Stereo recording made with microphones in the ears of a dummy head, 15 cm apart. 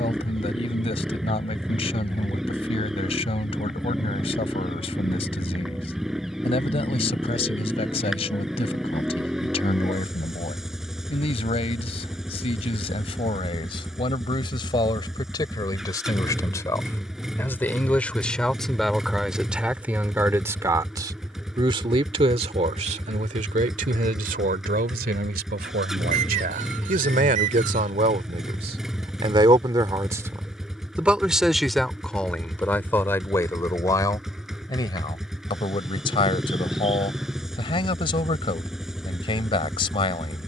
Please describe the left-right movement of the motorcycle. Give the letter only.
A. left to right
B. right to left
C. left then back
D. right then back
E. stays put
E.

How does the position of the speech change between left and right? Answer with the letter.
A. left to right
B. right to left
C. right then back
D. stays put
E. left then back
C.